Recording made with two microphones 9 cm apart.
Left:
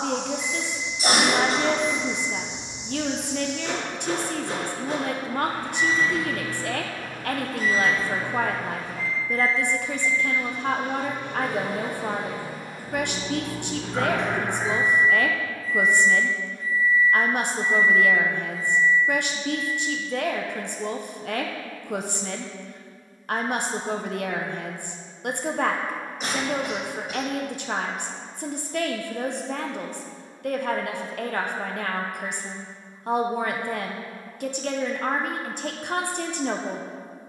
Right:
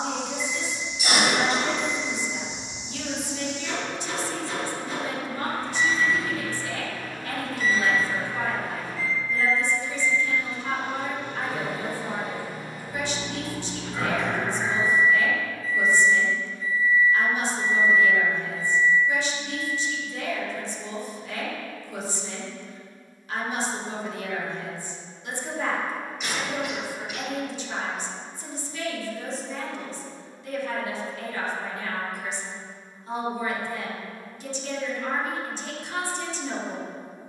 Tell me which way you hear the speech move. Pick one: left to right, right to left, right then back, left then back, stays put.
stays put.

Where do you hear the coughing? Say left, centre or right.
left.